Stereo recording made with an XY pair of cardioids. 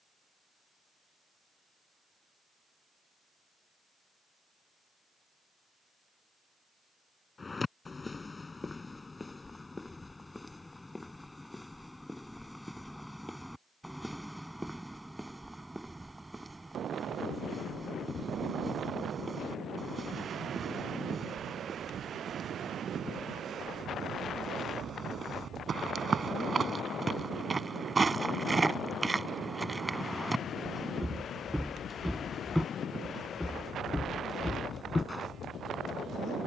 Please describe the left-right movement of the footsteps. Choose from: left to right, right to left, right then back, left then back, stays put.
right then back.